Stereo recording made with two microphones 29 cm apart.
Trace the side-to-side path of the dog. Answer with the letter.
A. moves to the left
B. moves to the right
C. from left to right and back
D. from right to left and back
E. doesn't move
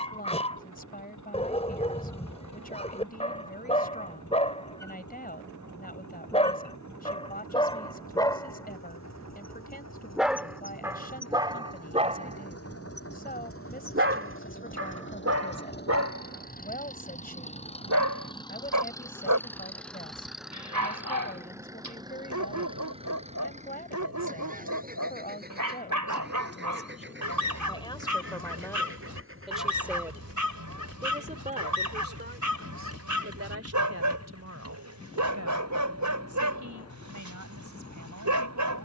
B.